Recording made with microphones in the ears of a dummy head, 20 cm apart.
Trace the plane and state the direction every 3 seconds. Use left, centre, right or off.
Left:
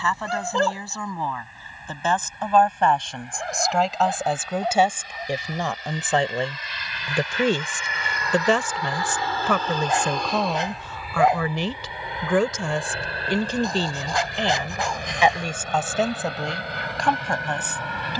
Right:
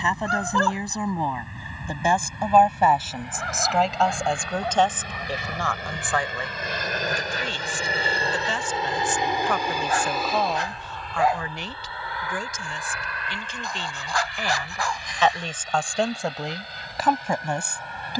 right, right, right, centre, left, left.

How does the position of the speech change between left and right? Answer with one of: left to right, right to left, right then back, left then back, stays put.
left then back.